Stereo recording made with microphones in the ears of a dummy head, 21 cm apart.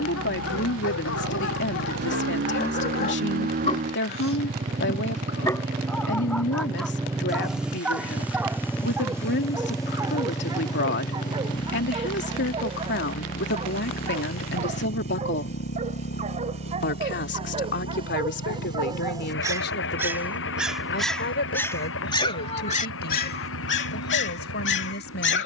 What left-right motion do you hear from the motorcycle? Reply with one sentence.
You can hear the motorcycle move from right to left.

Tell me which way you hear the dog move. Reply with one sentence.
In this clip you hear the dog go right and come back.